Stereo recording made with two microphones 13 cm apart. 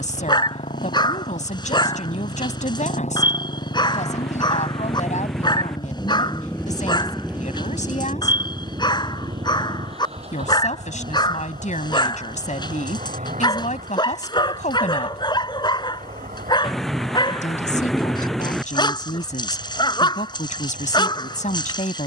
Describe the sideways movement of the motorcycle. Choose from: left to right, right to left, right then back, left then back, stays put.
left to right.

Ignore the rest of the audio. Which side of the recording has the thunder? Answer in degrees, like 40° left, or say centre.
centre.